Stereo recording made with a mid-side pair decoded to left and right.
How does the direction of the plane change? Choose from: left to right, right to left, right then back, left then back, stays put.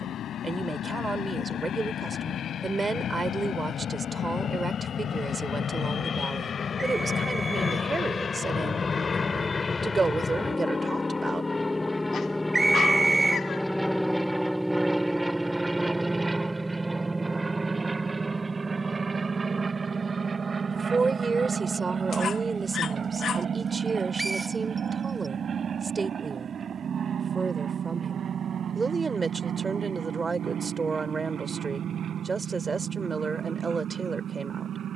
left to right.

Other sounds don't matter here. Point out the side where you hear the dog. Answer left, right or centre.
left.